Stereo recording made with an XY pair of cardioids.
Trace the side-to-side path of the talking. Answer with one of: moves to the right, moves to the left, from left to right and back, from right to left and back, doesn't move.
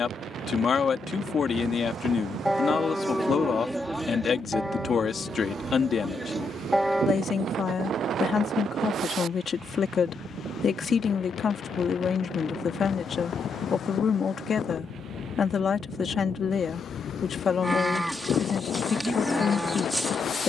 doesn't move.